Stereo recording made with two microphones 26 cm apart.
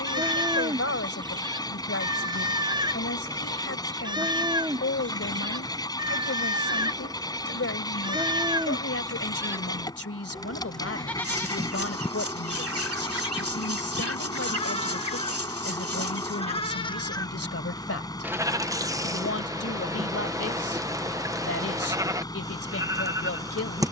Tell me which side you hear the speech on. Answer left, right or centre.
left.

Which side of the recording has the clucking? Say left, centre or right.
right.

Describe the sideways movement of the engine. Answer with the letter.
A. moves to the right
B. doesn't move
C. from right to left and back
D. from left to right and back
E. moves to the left
B.